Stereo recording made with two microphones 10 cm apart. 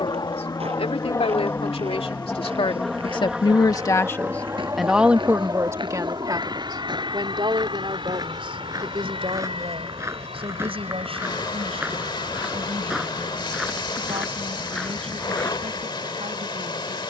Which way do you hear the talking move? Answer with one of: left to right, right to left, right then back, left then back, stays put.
left to right.